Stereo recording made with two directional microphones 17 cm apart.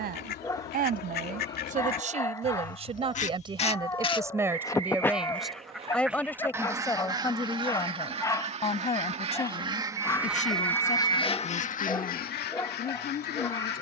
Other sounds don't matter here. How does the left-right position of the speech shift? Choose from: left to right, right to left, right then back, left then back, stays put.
right to left.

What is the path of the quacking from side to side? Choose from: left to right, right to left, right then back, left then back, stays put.
right then back.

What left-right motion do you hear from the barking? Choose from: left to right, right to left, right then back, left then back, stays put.
stays put.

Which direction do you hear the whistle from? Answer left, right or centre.
right.